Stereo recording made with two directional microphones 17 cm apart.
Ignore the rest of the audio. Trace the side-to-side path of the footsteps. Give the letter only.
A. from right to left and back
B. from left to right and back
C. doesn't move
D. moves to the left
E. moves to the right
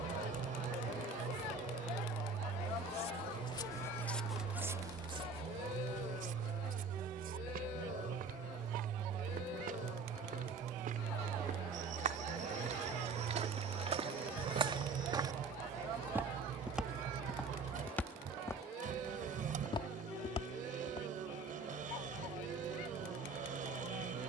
B.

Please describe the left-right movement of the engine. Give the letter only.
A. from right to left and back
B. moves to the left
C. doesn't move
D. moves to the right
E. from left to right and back
C.